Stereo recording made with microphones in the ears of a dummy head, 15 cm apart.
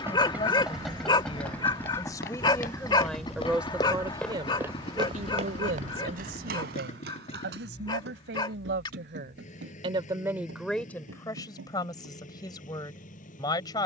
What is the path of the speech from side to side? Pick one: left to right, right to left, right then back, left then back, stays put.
right then back.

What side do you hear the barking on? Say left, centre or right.
left.